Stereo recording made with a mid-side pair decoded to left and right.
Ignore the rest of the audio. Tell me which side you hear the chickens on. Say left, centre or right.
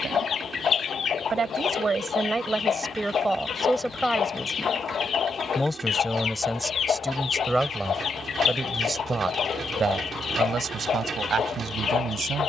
left.